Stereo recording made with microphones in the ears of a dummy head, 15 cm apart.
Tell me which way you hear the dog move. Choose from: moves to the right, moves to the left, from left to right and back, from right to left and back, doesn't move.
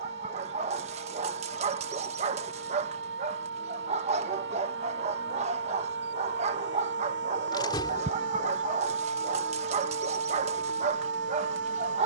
doesn't move.